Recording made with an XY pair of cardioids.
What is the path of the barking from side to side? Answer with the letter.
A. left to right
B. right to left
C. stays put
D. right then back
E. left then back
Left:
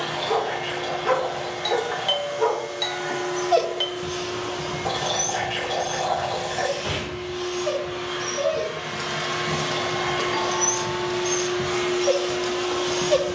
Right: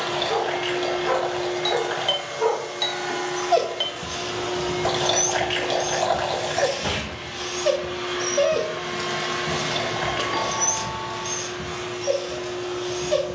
D.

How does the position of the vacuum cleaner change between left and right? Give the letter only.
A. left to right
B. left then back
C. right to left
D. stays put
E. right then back
C.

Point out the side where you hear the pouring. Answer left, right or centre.
right.